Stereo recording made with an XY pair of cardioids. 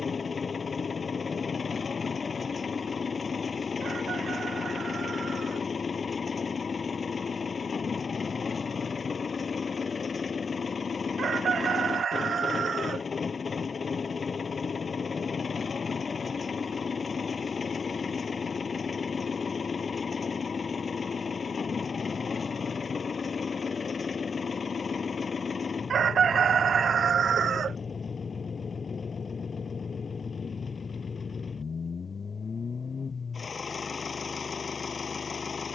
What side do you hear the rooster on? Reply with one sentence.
You can hear the rooster on the right.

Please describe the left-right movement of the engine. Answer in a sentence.
In this clip you hear the engine stay put.